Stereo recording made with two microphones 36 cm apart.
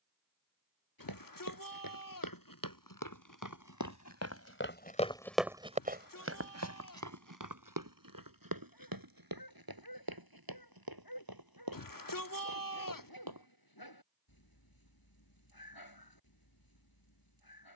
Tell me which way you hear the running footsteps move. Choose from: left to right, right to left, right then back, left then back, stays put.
left to right.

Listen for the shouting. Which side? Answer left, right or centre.
left.